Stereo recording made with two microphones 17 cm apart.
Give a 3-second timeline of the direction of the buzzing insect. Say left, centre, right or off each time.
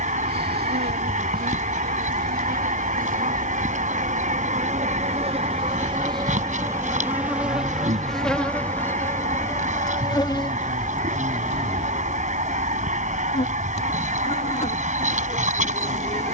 right, right, centre, left, left, left.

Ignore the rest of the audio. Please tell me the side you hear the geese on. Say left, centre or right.
right.